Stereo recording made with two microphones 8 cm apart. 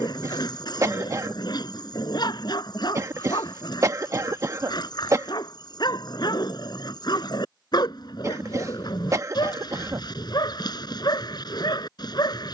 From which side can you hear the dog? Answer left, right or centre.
left.